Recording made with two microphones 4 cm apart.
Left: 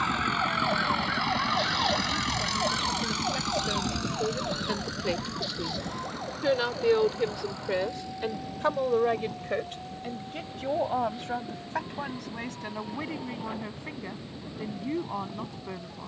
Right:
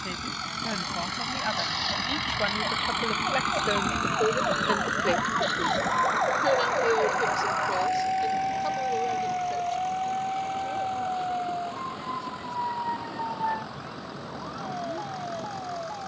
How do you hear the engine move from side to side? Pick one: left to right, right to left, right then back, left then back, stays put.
left to right.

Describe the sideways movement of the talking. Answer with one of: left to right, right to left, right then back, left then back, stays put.
right to left.